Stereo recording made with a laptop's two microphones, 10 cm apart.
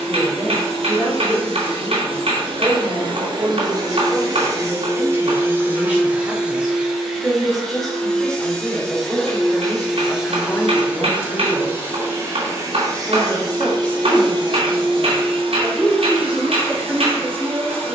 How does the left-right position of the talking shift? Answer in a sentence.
In this clip you hear the talking go left and come back.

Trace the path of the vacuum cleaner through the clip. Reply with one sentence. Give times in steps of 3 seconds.
In this clip you hear the vacuum cleaner on the right from 0 s, in the centre from 6 s and on the right from 12 s.